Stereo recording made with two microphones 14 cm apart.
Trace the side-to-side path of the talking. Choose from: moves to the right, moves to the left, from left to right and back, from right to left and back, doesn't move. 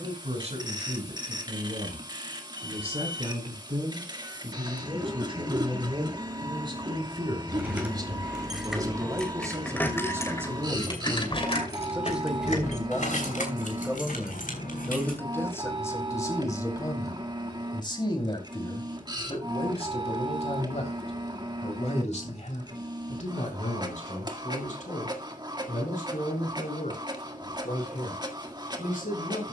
moves to the left.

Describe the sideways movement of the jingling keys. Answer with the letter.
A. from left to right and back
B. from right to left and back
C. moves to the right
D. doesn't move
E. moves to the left
E.